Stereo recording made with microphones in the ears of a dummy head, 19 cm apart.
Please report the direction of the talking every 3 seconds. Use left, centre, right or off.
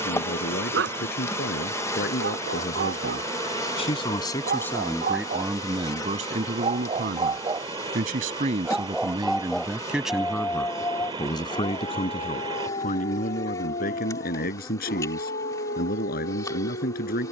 left, centre, right, centre, left, left.